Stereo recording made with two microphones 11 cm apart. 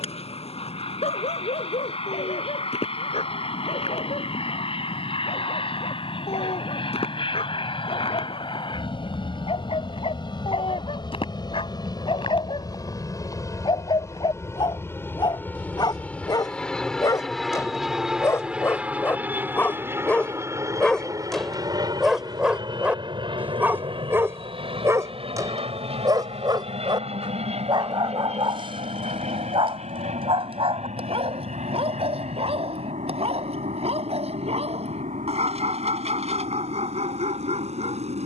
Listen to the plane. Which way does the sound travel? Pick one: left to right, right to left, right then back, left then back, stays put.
left to right.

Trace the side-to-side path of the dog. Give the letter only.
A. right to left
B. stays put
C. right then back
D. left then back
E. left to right
E.